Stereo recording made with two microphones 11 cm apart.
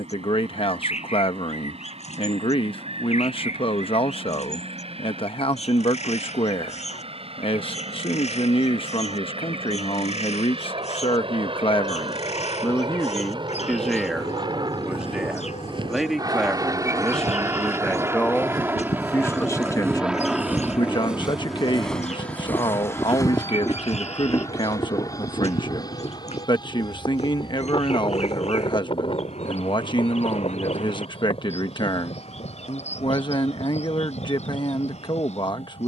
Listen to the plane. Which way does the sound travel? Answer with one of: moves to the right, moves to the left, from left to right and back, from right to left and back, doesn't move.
moves to the left.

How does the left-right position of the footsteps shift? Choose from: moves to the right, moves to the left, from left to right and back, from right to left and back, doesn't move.
moves to the left.